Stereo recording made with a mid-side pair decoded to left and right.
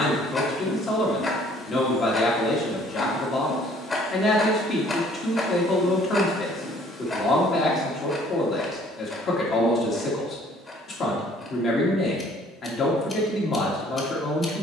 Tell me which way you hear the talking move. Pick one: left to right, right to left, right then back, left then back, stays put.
stays put.